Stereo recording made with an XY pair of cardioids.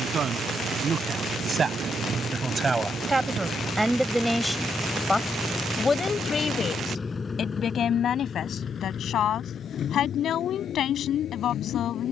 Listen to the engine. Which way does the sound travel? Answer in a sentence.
You can hear the engine go from the right side to the left.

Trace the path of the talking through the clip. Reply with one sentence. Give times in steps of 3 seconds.
In this clip you hear the talking on the right from 0 s, in the centre from 3 s and on the left from 6 s.